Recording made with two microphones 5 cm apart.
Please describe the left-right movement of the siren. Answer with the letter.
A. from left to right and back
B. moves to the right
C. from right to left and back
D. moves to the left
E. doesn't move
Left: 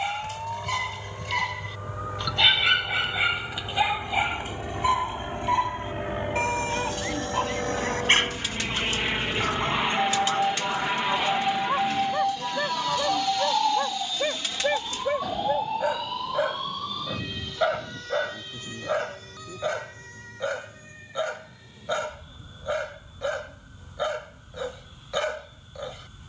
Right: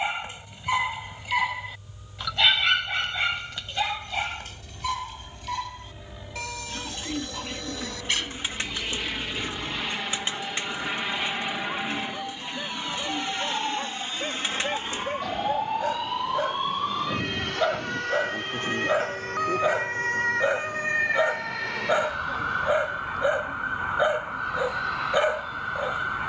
B.